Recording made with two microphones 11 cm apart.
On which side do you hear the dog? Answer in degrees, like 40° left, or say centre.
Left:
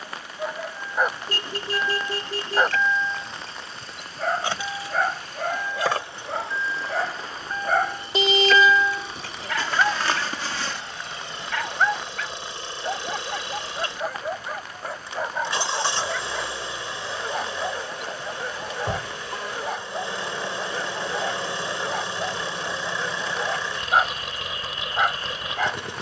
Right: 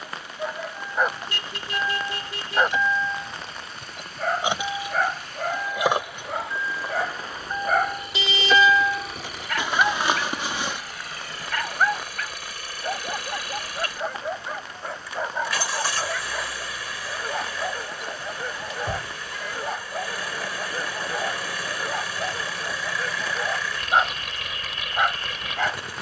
centre.